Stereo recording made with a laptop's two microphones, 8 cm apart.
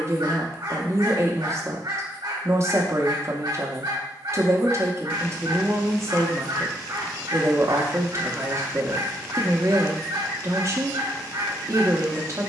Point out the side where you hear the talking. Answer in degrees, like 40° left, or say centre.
40° right.